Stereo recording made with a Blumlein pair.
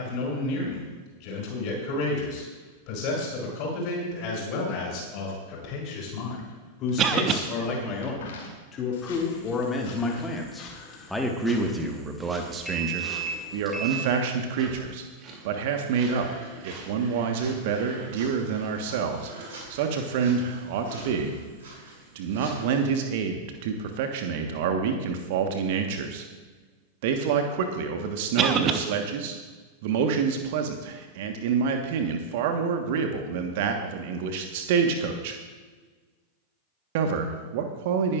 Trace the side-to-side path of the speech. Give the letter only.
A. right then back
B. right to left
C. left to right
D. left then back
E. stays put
C.